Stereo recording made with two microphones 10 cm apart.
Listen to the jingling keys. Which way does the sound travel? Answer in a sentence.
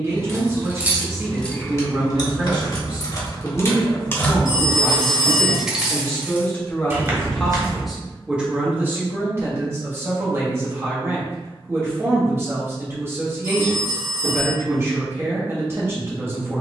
In this clip you hear the jingling keys go left and come back.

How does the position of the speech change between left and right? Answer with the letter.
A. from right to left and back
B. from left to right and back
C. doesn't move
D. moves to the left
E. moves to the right
A.